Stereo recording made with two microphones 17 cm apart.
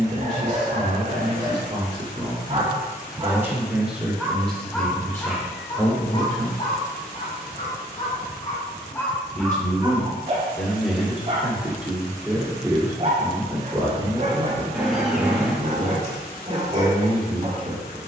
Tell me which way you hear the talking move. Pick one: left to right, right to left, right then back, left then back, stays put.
left then back.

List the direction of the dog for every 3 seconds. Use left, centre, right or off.
right, centre, left, right, right, right.